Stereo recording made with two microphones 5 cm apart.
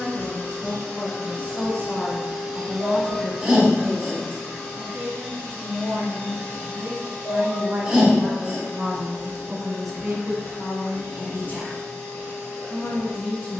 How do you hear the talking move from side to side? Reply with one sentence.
You can hear the talking move from left to right and back again.